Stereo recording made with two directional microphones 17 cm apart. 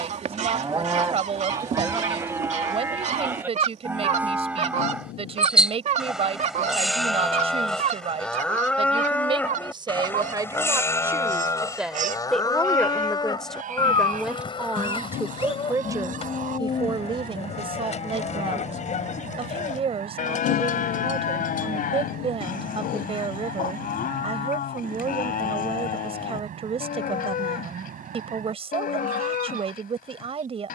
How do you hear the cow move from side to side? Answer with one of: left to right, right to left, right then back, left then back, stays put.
right to left.